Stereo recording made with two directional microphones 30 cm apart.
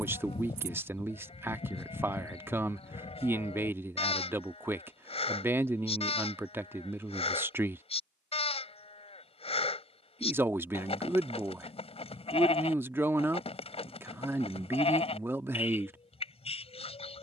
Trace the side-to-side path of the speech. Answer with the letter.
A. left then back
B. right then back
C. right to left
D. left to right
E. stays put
E.